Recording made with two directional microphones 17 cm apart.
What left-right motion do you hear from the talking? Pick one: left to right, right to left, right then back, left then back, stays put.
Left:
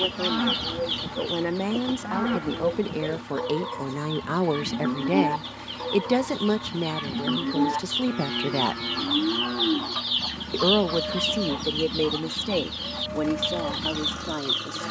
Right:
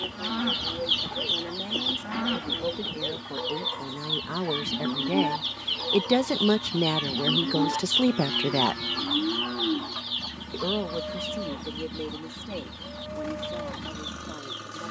right then back.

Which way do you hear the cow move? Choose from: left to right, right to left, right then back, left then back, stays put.
stays put.